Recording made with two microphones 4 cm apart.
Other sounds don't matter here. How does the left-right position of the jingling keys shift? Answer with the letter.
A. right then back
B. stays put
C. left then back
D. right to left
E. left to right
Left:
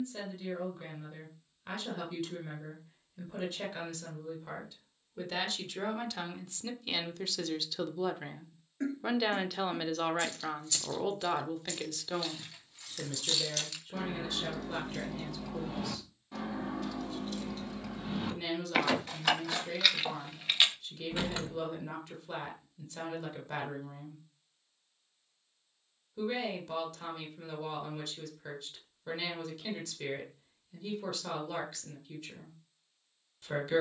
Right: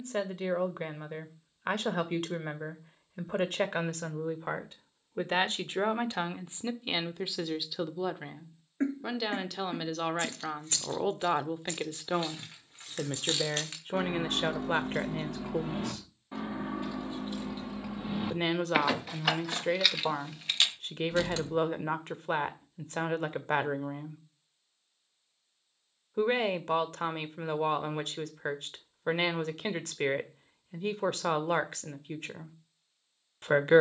D.